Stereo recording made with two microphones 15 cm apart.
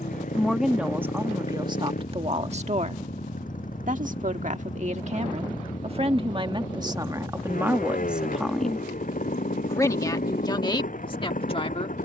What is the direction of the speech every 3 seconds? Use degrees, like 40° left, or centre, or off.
30° right, 50° right, 20° right, 30° left.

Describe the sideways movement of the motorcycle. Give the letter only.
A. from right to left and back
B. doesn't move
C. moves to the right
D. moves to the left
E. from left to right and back
B.